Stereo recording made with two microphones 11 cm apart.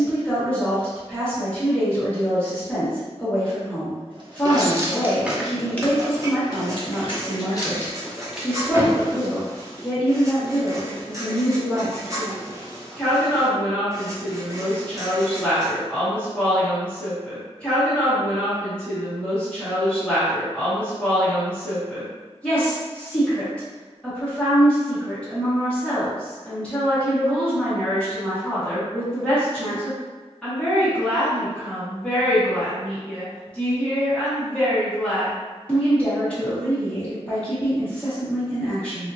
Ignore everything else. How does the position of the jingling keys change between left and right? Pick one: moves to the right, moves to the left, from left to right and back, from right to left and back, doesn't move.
from right to left and back.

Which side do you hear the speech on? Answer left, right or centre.
centre.